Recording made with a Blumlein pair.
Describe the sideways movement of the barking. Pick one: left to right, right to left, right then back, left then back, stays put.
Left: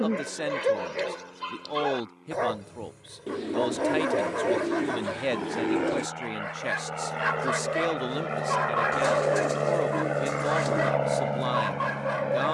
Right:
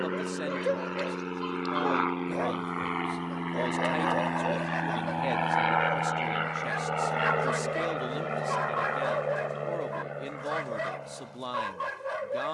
stays put.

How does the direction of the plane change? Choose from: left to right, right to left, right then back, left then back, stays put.
right to left.